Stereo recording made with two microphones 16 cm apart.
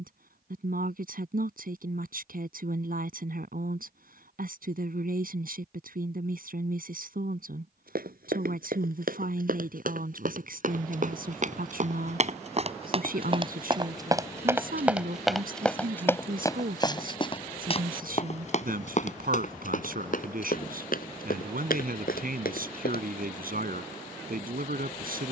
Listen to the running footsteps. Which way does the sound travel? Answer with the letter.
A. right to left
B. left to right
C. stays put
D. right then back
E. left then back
A.